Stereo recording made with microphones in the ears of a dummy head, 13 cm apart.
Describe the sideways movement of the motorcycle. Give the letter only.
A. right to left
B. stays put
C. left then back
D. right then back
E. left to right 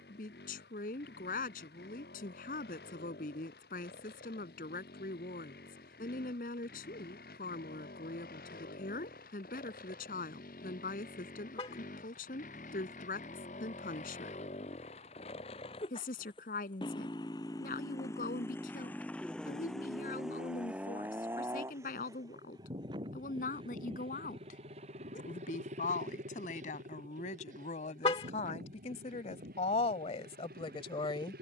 E.